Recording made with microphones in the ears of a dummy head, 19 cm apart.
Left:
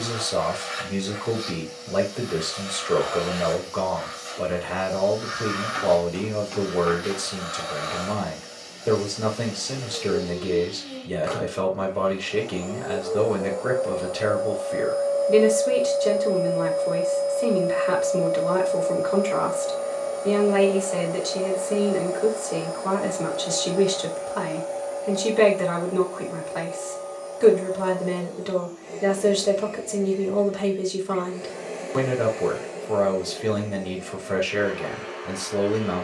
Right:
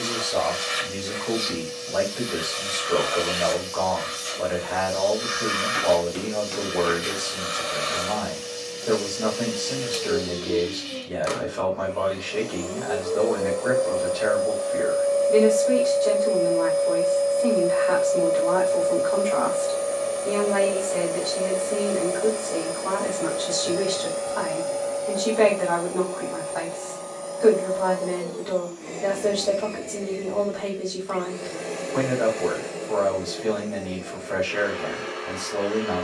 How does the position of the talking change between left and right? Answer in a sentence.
You can hear the talking stay in one place.